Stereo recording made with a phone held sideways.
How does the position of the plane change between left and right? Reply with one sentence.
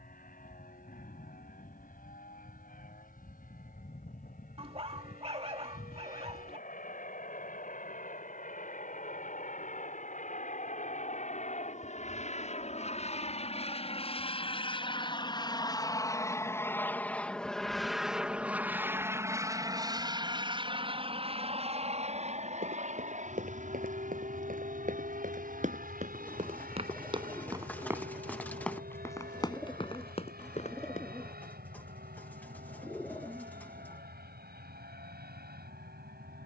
In this clip you hear the plane go from the left side to the right.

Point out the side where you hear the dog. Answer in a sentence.
You can hear the dog on the right.